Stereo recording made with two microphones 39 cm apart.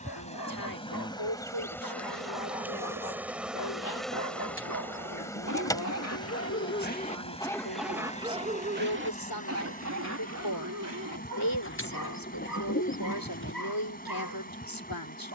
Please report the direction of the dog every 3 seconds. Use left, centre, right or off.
left, left, centre, right, right.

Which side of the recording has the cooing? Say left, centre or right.
left.